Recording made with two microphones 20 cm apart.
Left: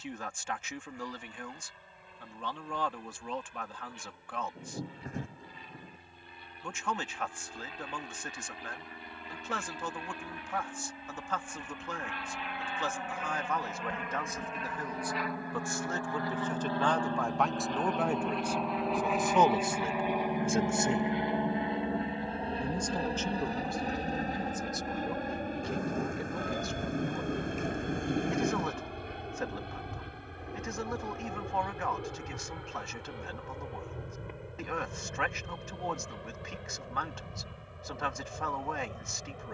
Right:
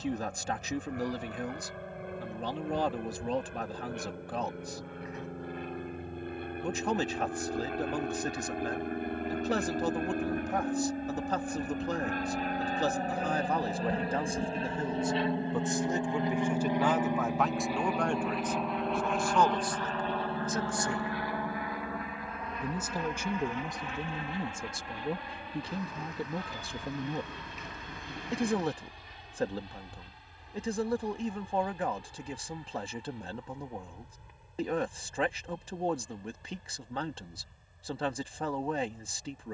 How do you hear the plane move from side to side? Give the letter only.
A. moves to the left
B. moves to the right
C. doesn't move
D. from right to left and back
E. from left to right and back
A.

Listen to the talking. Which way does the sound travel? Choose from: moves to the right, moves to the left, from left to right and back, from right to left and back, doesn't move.
from right to left and back.